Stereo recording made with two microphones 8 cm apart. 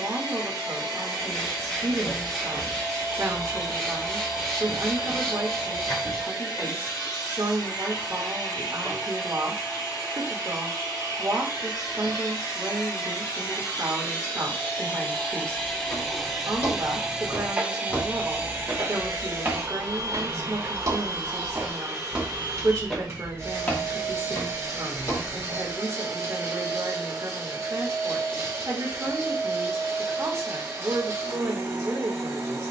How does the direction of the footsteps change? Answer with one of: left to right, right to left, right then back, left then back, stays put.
right then back.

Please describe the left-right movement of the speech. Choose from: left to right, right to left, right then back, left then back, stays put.
stays put.